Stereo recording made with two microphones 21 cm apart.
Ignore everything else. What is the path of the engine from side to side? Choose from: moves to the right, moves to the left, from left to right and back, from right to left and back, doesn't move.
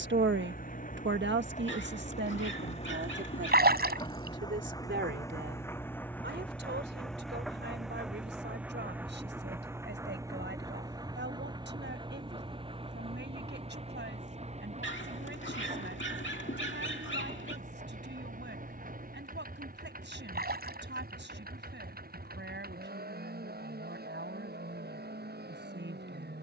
moves to the right.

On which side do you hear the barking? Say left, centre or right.
left.